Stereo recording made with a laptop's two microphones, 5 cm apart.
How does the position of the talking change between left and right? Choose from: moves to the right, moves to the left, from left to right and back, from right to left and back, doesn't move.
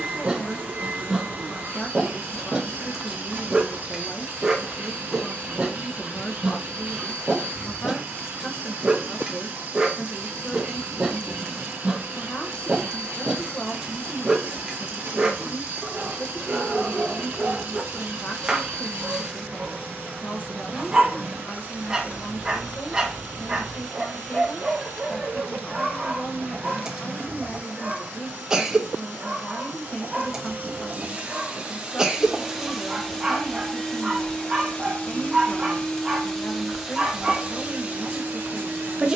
doesn't move.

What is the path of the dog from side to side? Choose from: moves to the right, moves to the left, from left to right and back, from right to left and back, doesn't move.
doesn't move.